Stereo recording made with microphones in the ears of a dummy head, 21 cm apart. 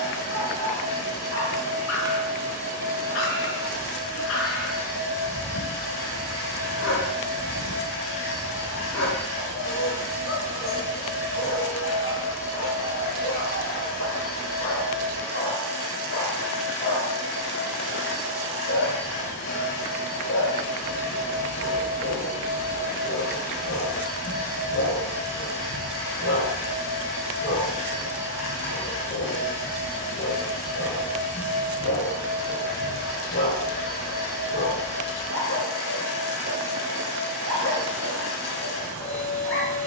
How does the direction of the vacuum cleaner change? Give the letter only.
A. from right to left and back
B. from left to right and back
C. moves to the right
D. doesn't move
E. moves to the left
D.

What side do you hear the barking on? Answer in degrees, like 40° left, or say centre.
60° left.